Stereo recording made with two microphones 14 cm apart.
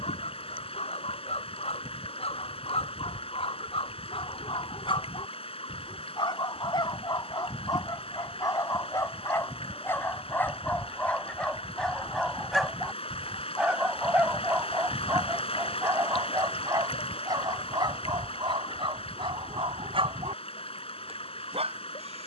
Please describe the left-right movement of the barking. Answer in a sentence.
You can hear the barking move from left to right.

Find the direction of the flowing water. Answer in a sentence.
In this clip you hear the flowing water on the left.